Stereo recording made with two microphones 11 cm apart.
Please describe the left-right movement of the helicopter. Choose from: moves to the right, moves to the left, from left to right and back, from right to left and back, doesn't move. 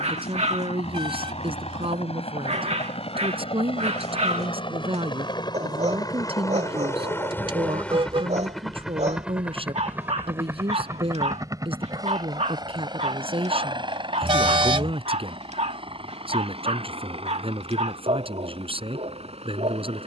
moves to the right.